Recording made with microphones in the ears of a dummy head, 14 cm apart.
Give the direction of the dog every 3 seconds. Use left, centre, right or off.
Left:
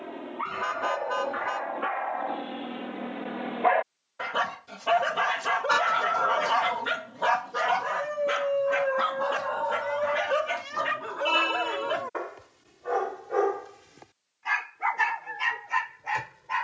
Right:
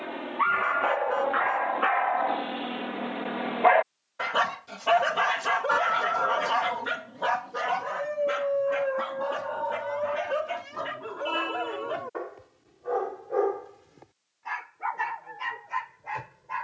right, centre, left, left, left, left.